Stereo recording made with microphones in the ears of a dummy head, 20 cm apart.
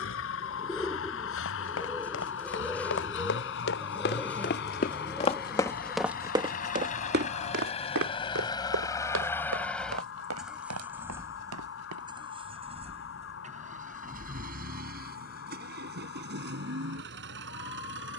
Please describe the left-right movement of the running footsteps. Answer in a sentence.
In this clip you hear the running footsteps move to the right.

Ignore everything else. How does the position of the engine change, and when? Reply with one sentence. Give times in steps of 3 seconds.
You can hear the engine on the left from 0 s, in the centre from 9 s and on the right from 12 s.